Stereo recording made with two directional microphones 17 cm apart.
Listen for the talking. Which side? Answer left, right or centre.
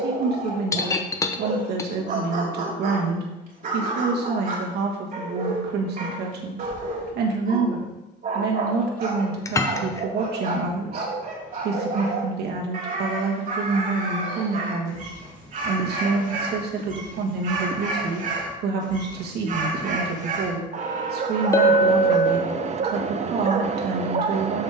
right.